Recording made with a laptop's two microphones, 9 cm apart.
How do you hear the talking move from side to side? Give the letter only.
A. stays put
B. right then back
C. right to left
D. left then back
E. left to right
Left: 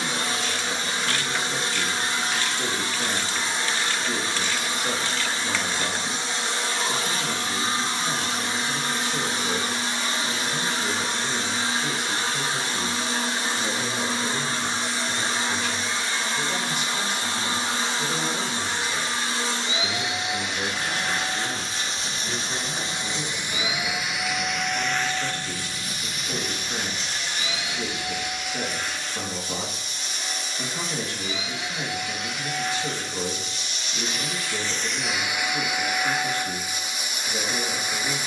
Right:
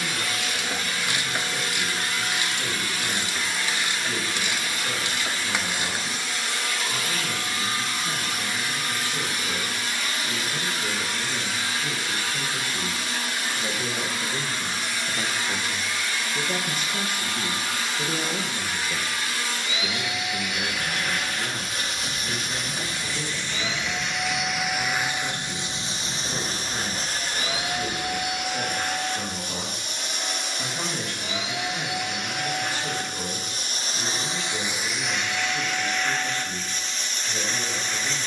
B.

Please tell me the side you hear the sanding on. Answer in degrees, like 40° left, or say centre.
60° right.